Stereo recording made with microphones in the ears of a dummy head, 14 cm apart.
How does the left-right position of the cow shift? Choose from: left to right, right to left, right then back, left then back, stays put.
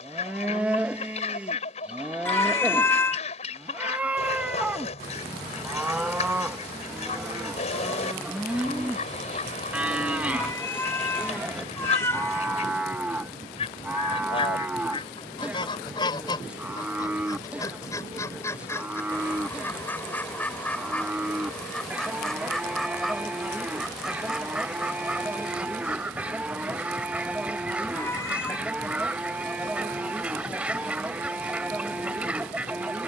stays put.